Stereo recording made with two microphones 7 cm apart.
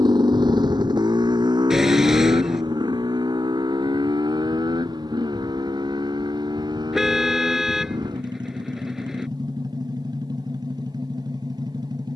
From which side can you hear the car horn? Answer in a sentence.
You can hear the car horn in the centre.